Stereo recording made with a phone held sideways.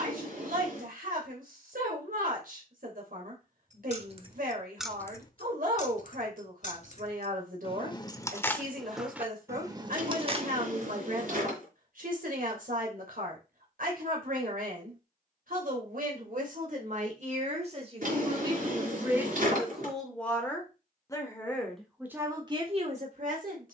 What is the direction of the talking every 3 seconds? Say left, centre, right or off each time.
right, right, right, right, right, right, centre, right.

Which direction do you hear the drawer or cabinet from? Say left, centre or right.
right.